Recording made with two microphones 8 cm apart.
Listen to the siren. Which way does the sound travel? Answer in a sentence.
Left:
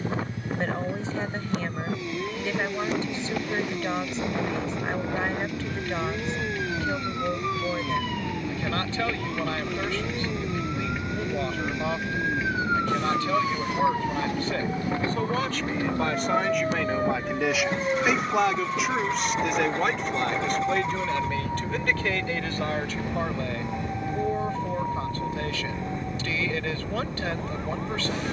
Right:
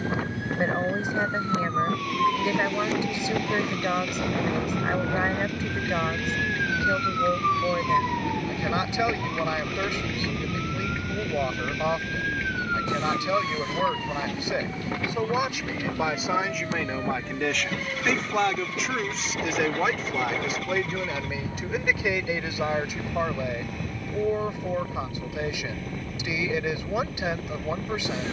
In this clip you hear the siren travel towards the left.